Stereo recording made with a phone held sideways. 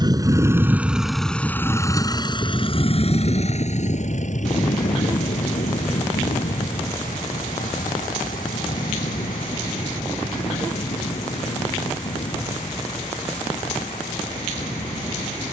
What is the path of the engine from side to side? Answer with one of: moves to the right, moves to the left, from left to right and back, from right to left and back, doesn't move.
moves to the left.